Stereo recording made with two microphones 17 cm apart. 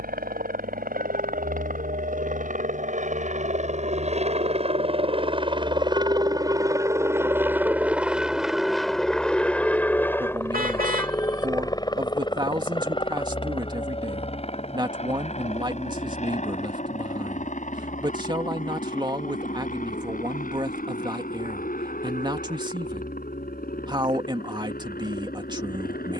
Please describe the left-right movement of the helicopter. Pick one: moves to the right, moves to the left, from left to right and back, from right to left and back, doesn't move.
moves to the left.